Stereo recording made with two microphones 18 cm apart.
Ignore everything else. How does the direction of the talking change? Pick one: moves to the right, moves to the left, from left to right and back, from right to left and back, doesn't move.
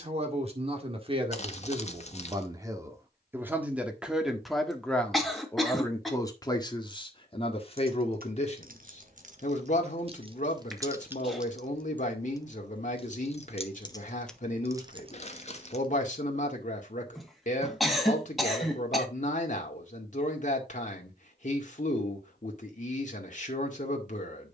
moves to the left.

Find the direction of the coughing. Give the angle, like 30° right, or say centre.
centre.